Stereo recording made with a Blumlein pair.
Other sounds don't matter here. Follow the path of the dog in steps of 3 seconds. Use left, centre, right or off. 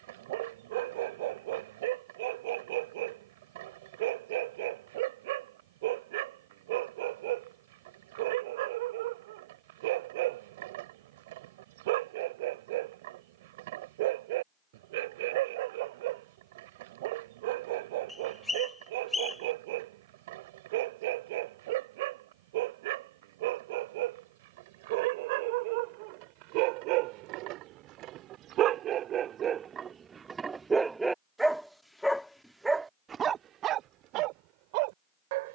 right, right, right, right, right, right, right, right, right, right, centre, right.